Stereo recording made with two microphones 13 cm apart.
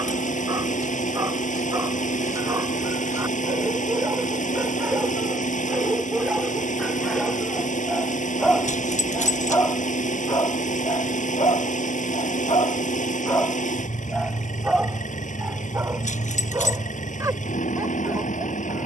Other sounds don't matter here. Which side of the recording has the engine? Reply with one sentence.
You can hear the engine on the left.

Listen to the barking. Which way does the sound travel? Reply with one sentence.
In this clip you hear the barking go left and come back.